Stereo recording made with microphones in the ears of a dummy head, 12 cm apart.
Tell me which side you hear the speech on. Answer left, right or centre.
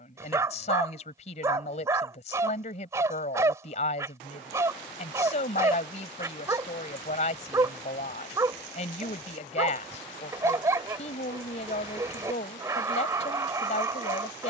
left.